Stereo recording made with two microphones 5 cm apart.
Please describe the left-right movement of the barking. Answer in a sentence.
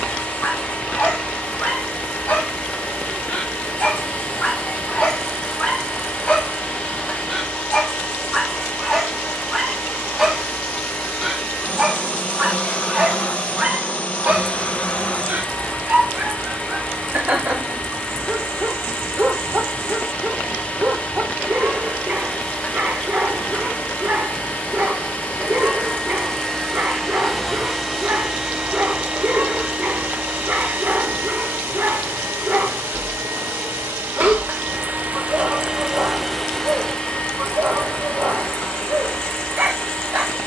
In this clip you hear the barking go from the left side to the right.